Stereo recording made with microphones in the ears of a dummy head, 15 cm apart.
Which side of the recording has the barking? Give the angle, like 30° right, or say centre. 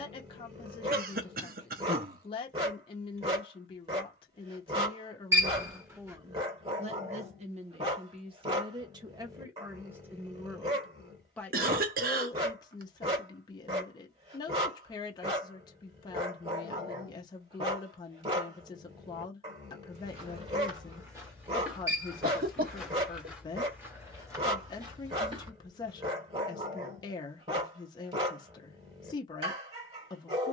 40° right.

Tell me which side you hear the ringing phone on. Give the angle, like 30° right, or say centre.
20° right.